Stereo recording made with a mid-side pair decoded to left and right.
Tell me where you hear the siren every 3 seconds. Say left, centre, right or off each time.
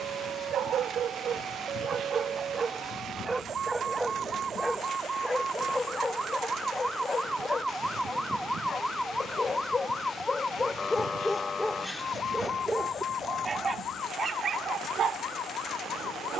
right, right, centre, left, left, left.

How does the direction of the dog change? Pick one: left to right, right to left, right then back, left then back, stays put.
left then back.